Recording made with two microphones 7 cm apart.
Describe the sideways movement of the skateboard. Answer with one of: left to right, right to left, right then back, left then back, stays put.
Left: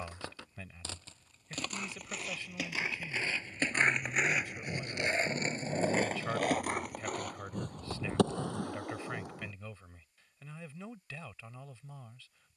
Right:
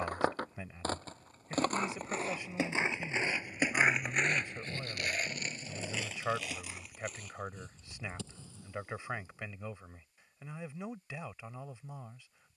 right to left.